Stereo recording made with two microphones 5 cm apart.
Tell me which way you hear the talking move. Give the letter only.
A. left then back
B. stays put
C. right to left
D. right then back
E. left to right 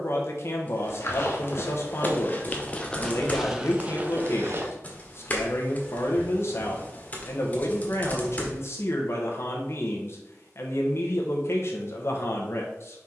B.